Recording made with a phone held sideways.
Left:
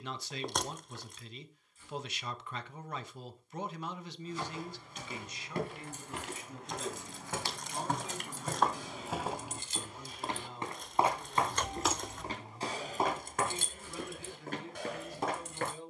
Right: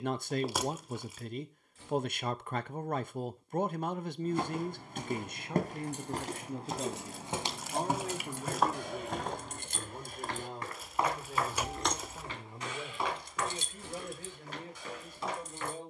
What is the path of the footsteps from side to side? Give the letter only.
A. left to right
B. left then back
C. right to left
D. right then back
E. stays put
C.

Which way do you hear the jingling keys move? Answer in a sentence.
You can hear the jingling keys go from the right side to the left.